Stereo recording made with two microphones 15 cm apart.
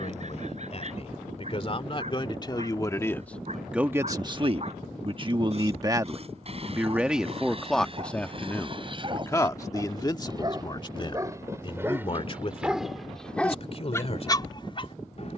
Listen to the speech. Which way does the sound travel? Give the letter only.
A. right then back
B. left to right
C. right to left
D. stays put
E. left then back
A.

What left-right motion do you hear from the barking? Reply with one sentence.
You can hear the barking move from right to left.